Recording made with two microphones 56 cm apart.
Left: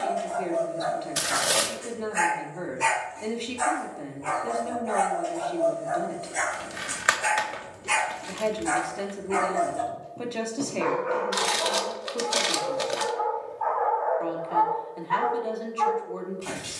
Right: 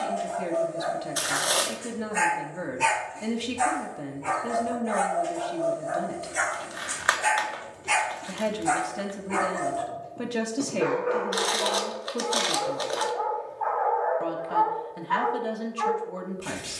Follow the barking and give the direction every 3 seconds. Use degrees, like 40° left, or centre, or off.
60° right, 40° right, 20° right, 20° left, 50° left, 60° left.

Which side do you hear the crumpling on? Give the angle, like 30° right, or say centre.
50° left.